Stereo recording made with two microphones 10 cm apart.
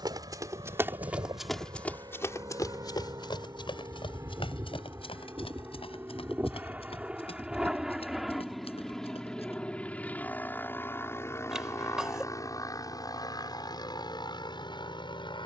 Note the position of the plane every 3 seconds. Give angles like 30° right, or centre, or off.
50° right, 30° right, 10° right, 20° left, 40° left.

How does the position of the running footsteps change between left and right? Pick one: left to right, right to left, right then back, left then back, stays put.
right to left.